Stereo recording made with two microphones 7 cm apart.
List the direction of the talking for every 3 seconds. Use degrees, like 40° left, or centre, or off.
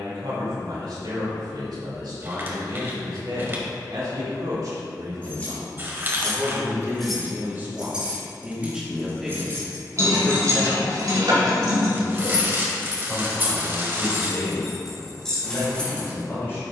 80° right, 60° right, 30° right, 10° left, 30° left, 40° left.